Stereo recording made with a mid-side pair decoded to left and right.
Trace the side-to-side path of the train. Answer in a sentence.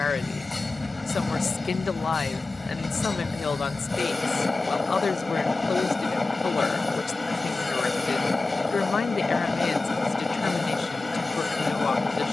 In this clip you hear the train stay in one place.